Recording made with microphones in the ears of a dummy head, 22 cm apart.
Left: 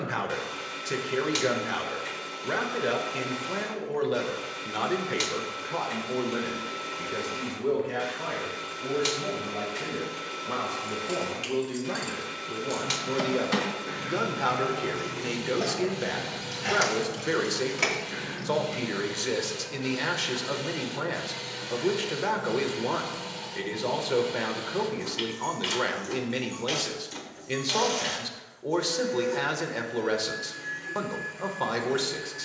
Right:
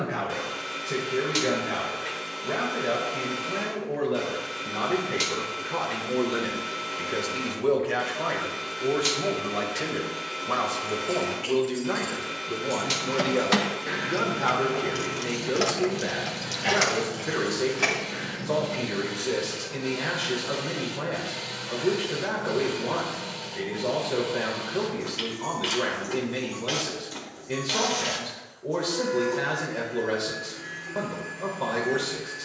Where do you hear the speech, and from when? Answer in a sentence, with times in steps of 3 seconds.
In this clip you hear the speech on the left from 0 s, on the right from 6 s, in the centre from 12 s and on the left from 15 s.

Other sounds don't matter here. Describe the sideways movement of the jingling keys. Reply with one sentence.
You can hear the jingling keys move from left to right and back again.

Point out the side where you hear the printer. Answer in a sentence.
You can hear the printer in the centre.